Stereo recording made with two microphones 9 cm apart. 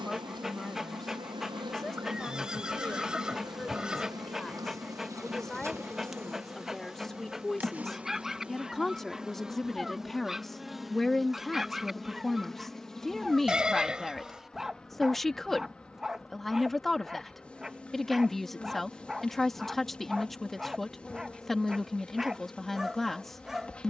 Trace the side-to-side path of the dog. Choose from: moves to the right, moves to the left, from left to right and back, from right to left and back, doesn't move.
doesn't move.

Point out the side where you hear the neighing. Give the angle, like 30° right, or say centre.
10° right.